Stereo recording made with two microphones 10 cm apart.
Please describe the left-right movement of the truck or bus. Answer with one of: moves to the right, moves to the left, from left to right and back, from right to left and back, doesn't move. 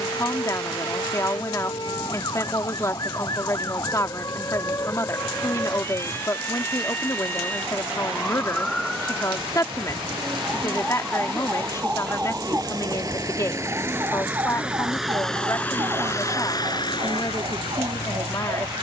moves to the left.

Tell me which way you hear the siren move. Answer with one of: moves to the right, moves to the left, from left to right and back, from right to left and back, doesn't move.
moves to the right.